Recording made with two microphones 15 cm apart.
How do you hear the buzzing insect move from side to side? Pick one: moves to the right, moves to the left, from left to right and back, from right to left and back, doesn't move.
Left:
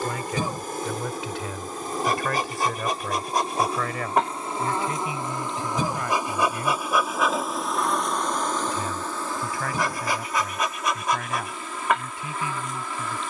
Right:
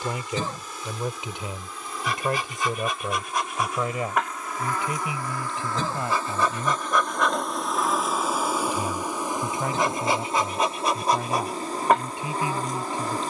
moves to the right.